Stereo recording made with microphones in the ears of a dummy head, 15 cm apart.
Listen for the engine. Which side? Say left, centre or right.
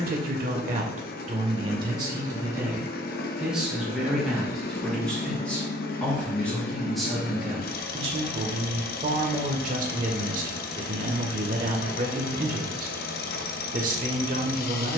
left.